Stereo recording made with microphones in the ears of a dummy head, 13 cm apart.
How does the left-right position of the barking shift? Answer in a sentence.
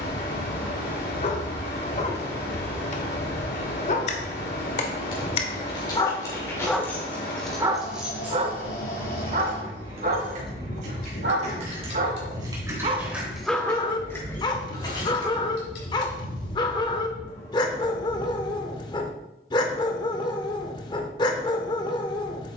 You can hear the barking go right and come back.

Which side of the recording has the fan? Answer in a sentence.
In this clip you hear the fan on the left.